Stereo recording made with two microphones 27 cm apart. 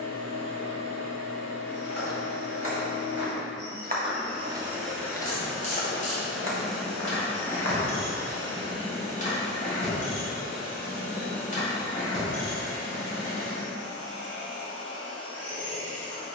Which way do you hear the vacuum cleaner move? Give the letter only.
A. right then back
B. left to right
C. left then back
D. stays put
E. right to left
E.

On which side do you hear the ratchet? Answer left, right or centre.
left.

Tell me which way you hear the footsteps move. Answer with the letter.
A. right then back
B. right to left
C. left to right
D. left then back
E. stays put
B.